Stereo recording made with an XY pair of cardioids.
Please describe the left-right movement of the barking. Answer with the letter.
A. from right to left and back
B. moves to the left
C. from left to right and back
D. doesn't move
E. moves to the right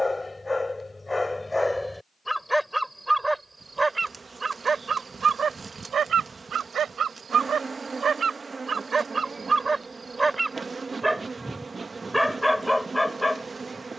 C.